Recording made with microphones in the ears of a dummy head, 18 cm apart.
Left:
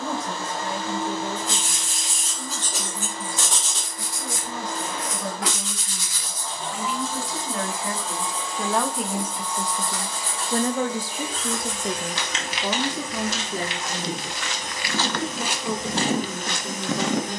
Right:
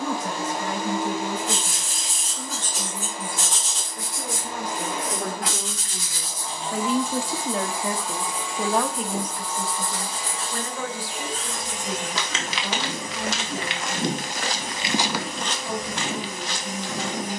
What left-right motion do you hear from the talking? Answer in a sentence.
In this clip you hear the talking travel towards the left.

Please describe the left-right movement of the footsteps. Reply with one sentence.
You can hear the footsteps move from right to left.